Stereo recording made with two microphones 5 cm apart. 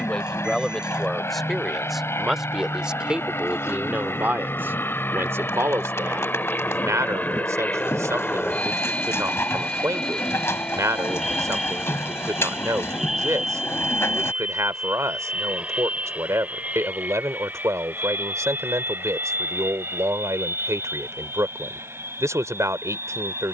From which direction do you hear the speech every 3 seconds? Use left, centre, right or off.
centre, right, right, right, right, right, right, right.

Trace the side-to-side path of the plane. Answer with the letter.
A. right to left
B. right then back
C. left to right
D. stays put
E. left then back
C.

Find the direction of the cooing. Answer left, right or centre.
left.